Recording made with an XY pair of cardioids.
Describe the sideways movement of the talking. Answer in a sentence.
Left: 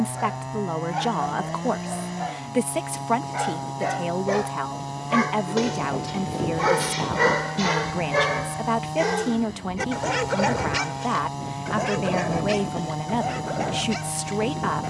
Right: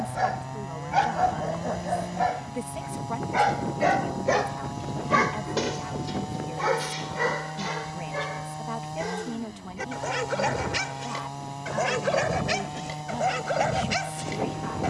In this clip you hear the talking stay put.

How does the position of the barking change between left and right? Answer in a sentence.
In this clip you hear the barking move from right to left and back again.